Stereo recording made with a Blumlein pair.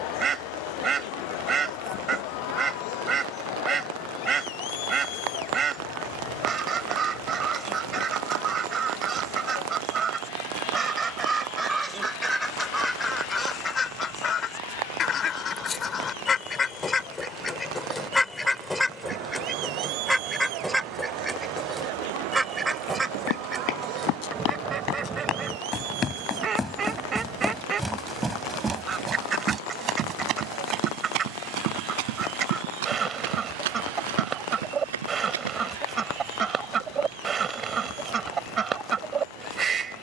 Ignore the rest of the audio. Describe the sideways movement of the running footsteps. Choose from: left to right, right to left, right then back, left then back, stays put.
left to right.